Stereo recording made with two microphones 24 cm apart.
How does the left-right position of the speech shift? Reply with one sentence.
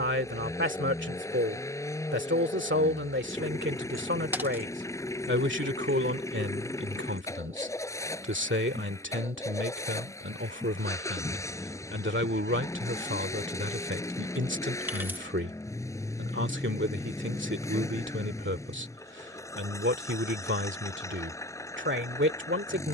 In this clip you hear the speech stay put.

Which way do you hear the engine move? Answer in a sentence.
You can hear the engine stay in one place.